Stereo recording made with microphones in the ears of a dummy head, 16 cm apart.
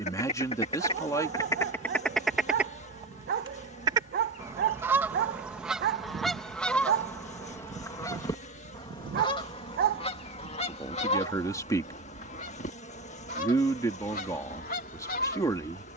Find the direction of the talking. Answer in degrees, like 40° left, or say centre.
20° left.